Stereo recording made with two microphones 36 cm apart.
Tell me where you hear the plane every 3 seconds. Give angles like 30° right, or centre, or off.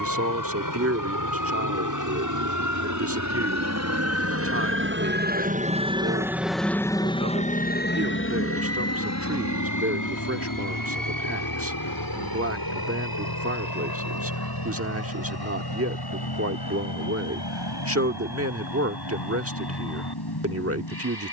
60° right, 40° right, 20° left, 50° left, 70° left, 70° left, 80° left.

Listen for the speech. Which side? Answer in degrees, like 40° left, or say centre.
40° right.